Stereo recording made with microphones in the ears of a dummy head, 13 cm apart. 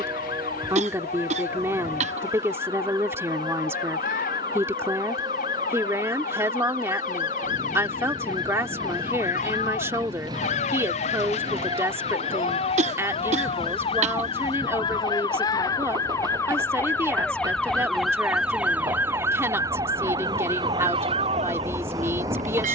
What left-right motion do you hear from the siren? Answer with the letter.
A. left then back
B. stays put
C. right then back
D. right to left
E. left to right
E.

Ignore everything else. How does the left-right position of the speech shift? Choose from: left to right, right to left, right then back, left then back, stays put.
stays put.